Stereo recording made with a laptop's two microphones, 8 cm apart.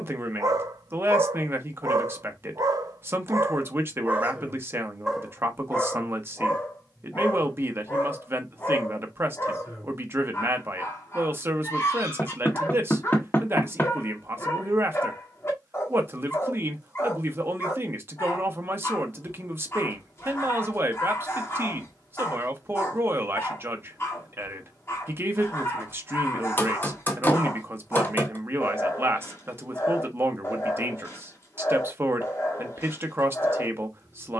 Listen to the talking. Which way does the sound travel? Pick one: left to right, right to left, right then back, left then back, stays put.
stays put.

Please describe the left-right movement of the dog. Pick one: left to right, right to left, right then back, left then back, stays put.
right to left.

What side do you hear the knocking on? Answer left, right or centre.
left.